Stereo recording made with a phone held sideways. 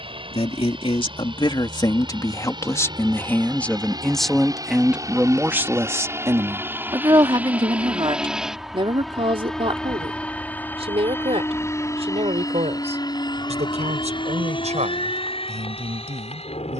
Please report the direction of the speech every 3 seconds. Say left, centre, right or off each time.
left, centre, right, right, right, right.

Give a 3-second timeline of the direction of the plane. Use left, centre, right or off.
right, right, centre, centre, left, left.